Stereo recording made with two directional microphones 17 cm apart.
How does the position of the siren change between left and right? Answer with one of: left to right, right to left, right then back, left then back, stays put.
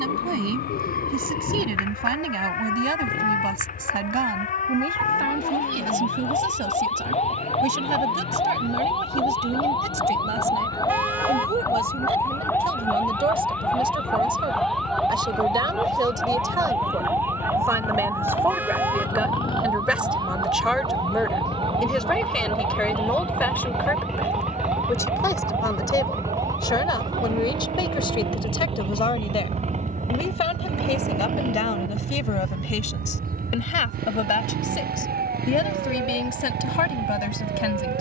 left to right.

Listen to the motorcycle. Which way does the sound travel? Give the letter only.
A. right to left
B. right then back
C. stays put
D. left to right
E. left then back
D.